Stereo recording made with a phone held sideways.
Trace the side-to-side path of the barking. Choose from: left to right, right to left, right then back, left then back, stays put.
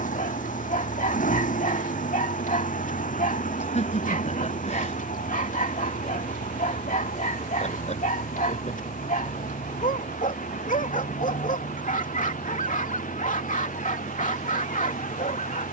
stays put.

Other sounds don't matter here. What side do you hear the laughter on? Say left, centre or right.
left.